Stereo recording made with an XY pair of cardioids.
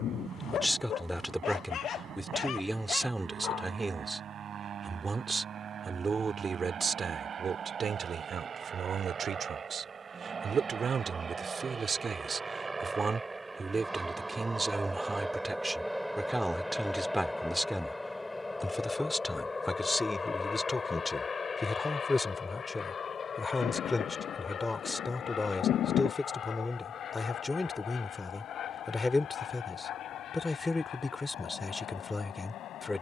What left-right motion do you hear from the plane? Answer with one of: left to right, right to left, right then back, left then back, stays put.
right to left.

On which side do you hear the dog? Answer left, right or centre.
left.